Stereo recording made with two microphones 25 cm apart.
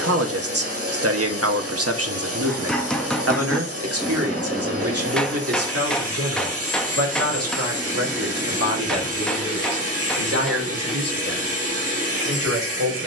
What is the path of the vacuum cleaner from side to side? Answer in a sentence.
You can hear the vacuum cleaner stay put.